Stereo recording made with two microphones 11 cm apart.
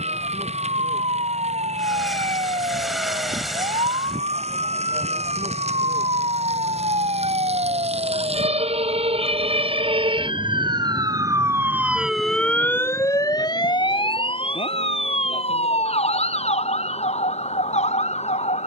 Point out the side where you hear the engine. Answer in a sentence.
In this clip you hear the engine in the centre.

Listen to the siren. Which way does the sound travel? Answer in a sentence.
In this clip you hear the siren move to the left.